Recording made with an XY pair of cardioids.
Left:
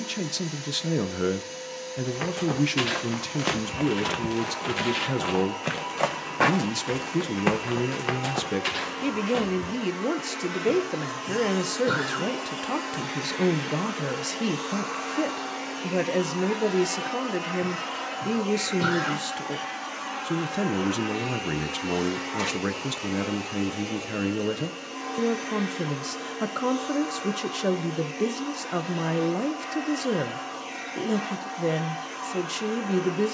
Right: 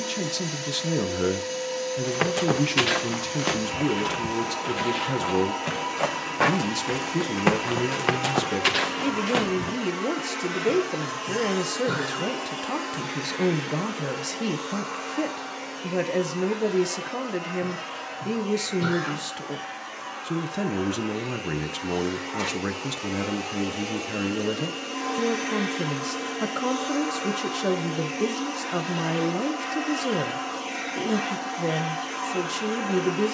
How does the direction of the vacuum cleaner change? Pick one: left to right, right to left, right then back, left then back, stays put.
left then back.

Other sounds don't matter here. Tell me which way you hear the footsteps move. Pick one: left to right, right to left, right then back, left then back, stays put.
left then back.